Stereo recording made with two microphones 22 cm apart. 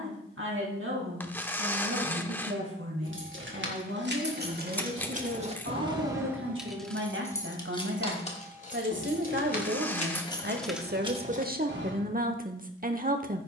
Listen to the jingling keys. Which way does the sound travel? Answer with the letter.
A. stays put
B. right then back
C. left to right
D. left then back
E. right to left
D.